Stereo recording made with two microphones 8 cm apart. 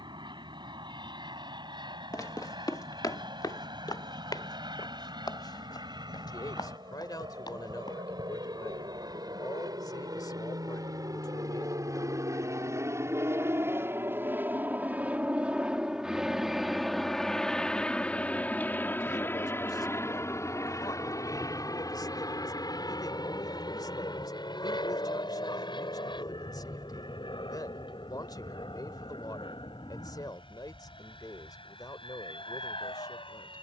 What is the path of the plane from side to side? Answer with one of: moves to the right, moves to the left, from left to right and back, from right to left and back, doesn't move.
moves to the left.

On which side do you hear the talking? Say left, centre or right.
left.